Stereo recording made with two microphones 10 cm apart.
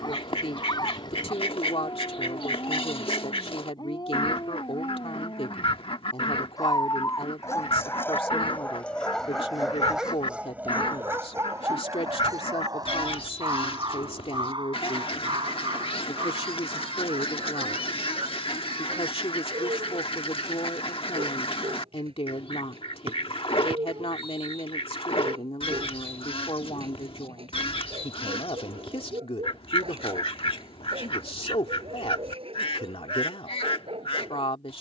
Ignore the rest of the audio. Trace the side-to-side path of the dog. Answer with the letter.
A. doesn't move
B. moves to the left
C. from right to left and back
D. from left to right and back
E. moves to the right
E.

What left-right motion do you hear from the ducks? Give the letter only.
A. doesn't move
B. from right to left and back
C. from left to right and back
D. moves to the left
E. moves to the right
A.